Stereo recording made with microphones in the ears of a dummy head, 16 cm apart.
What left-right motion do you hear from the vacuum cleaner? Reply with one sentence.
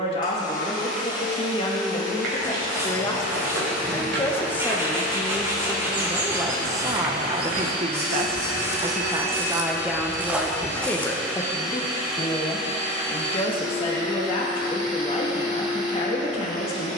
In this clip you hear the vacuum cleaner go from the left side to the right.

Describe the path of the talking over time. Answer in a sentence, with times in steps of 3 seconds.
You can hear the talking on the left from 0 s, in the centre from 3 s, on the right from 6 s, in the centre from 9 s and on the left from 12 s.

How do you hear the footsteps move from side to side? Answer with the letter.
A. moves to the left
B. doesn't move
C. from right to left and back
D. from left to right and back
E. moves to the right
A.